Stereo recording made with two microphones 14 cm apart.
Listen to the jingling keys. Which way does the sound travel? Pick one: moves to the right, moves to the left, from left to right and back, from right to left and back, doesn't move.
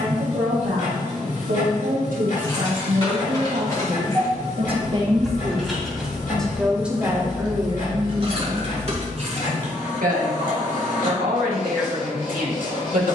moves to the right.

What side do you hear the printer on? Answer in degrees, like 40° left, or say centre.
70° left.